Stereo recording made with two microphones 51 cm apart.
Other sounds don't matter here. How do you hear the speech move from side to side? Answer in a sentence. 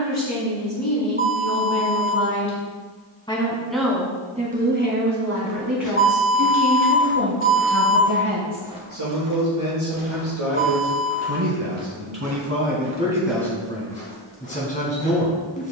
In this clip you hear the speech move from left to right and back again.